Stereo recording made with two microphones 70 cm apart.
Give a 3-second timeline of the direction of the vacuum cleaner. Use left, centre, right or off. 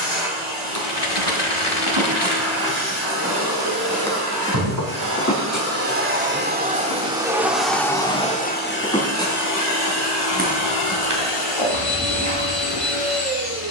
right, right, centre, left, left.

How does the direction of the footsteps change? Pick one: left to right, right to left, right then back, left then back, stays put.
left then back.